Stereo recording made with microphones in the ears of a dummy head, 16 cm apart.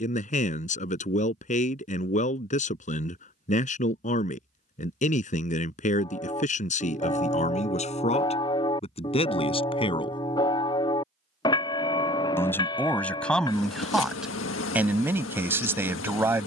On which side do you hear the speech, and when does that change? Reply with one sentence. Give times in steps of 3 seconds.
In this clip you hear the speech on the left from 0 s and in the centre from 12 s.